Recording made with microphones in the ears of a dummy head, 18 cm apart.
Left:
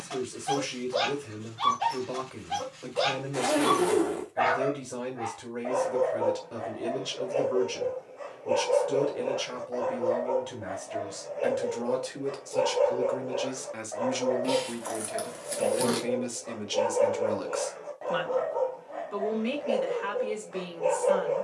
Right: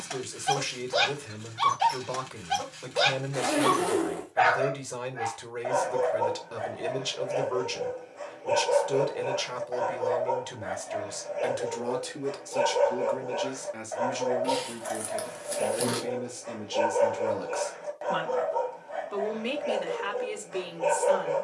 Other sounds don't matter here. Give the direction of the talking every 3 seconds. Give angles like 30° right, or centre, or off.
30° right, 30° right, 30° right, 30° right, centre, 20° left, 20° right.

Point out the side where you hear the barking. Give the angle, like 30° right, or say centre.
60° right.